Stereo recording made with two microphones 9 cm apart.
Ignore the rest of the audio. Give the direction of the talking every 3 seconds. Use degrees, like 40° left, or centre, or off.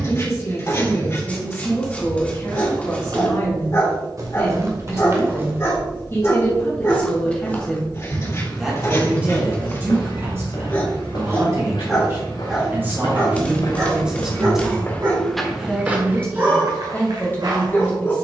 30° left, 30° left, 20° left, 30° right, 10° right, 20° left.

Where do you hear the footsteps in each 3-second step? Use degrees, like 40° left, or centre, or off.
60° right, 40° right, 20° left, 60° left, 50° left, 30° right.